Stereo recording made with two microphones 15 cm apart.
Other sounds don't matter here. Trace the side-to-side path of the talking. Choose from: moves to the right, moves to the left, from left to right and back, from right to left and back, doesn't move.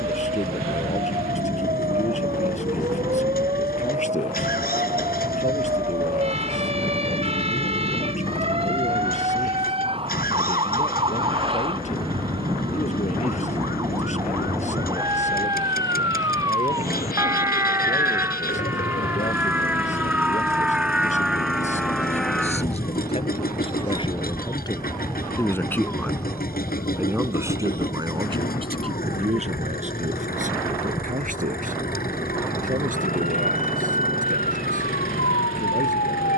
moves to the right.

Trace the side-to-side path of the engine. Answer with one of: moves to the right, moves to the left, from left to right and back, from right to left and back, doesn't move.
doesn't move.